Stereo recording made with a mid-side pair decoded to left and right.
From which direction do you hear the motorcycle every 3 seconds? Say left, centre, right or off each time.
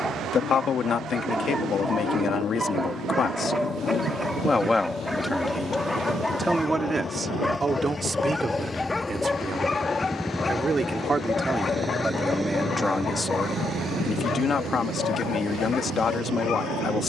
left, left, left, centre, right, right.